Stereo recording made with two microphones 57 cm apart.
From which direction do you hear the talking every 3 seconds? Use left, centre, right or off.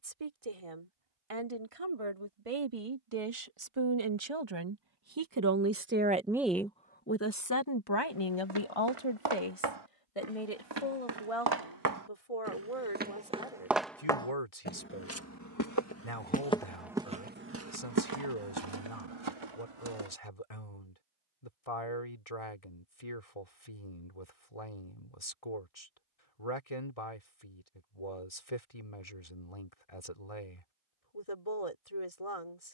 right, right, left, left, left, left, left, left, left, left, left.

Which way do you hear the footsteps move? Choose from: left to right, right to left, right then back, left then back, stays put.
left then back.